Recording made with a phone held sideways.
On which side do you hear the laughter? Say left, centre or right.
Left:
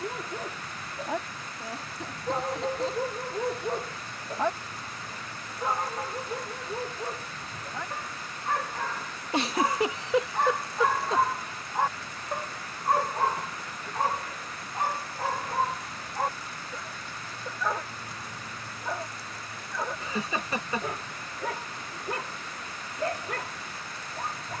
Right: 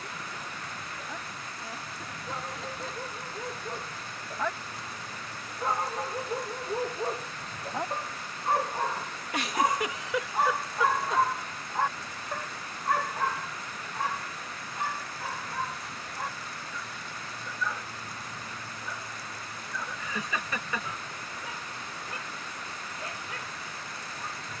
left.